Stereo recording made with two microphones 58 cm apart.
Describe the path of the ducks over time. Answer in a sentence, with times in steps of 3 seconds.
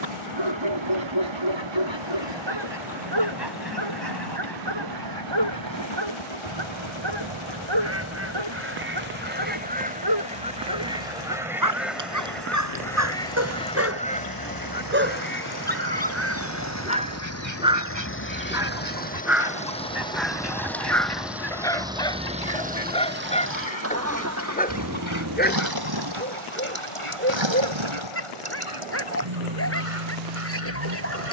You can hear the ducks on the right from 0 s, in the centre from 9 s and on the left from 15 s.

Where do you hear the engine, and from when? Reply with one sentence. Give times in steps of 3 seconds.
In this clip you hear the engine on the left from 0 s, in the centre from 18 s and on the right from 24 s.